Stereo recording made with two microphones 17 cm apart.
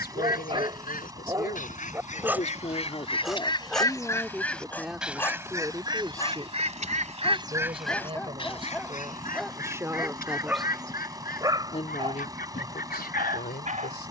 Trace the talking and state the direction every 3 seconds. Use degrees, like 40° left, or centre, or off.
60° left, centre, 30° right, centre, 60° left.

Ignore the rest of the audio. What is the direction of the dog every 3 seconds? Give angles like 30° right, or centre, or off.
20° right, 10° left, 10° left, 10° right, 40° right.